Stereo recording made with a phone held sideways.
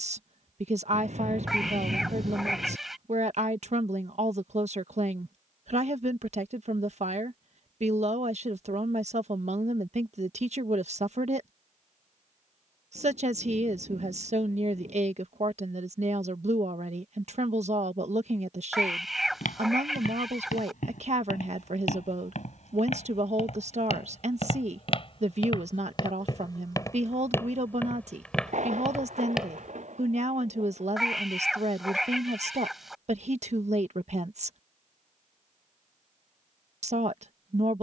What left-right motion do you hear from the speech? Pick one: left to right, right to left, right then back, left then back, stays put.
stays put.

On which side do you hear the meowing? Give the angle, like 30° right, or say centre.
centre.